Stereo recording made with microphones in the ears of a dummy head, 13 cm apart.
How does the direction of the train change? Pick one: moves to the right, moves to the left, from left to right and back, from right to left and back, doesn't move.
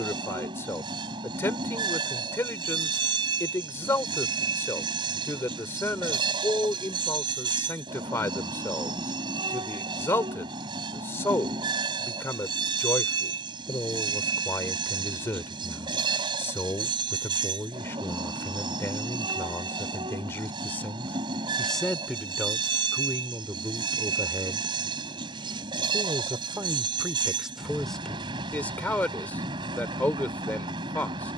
doesn't move.